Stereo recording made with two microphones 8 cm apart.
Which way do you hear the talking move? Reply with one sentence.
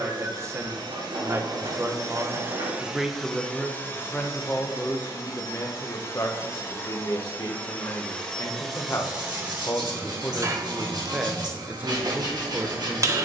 You can hear the talking go left and come back.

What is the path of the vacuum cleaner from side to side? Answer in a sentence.
You can hear the vacuum cleaner go left and come back.